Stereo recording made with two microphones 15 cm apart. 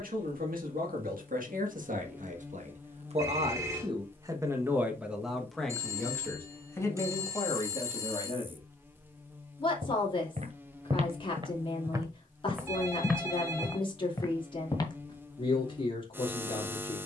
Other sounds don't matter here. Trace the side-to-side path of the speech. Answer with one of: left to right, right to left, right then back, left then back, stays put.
right to left.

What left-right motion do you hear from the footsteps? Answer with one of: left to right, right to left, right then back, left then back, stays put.
right to left.